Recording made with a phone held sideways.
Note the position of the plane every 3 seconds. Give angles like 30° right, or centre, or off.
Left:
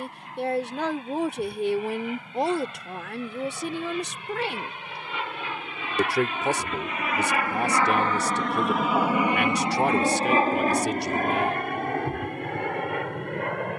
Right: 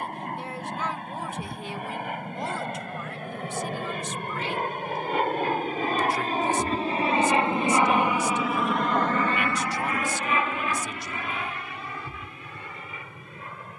70° right, 60° right, 20° right, 40° left, 60° left.